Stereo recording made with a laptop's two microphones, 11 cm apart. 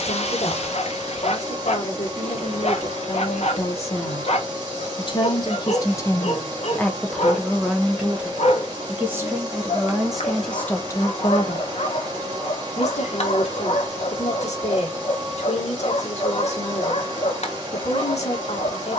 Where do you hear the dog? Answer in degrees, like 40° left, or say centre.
70° left.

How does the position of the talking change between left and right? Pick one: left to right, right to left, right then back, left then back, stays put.
right then back.